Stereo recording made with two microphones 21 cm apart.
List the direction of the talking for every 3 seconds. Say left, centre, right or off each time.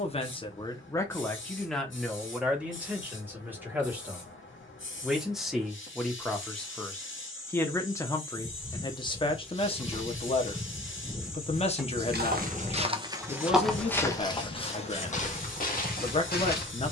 centre, centre, centre, left, left, left.